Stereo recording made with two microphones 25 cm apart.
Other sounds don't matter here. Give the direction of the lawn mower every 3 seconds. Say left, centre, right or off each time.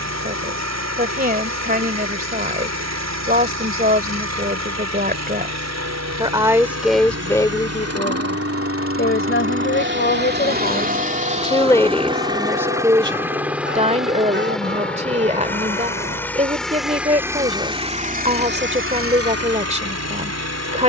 right, right, right, right, centre, centre, right.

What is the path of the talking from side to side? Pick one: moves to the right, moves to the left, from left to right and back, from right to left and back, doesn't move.
from right to left and back.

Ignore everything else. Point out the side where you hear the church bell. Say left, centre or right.
right.